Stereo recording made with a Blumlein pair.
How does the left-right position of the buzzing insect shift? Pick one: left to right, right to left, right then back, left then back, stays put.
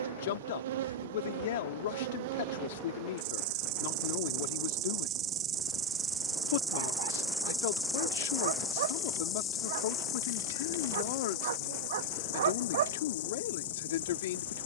right to left.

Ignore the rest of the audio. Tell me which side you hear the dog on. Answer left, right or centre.
right.